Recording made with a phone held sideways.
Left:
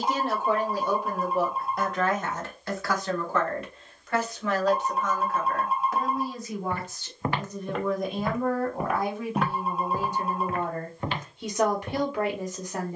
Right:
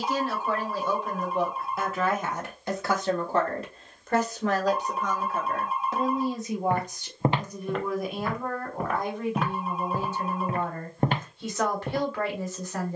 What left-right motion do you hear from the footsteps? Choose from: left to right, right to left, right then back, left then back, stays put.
left then back.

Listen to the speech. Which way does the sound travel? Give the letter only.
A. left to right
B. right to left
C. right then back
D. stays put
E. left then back
C.